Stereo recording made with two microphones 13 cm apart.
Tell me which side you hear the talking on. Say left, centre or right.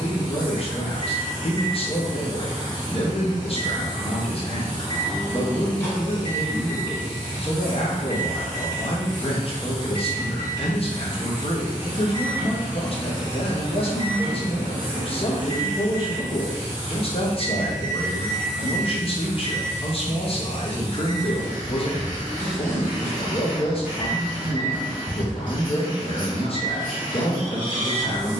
left.